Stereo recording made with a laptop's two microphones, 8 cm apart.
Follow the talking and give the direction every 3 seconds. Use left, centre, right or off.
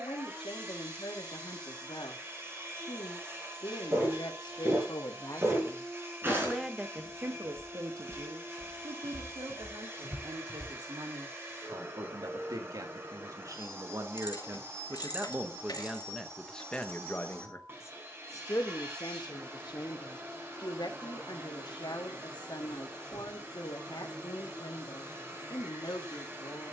left, left, right, right, right, centre, left, left, left.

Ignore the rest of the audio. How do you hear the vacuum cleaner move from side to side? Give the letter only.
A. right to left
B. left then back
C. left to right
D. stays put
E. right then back
D.